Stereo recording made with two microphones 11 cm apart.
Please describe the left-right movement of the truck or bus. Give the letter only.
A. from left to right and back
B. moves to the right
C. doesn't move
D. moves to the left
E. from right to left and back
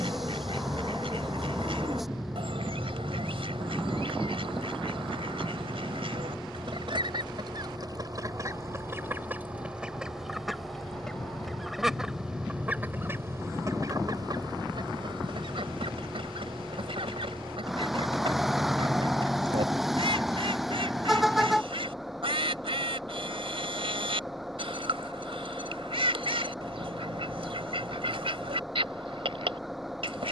C.